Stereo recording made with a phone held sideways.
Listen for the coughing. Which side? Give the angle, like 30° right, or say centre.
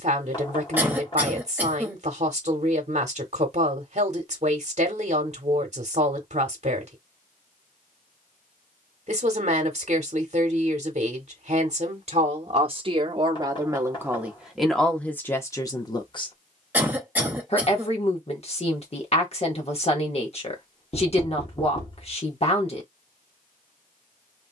10° right.